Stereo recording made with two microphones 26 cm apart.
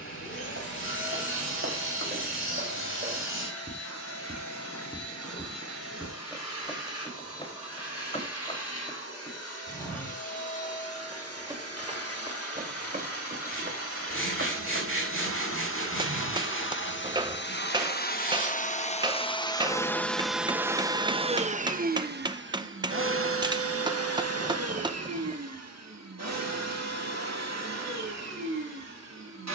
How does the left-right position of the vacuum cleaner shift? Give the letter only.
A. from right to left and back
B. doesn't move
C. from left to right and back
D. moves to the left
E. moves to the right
E.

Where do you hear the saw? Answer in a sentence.
In this clip you hear the saw on the left.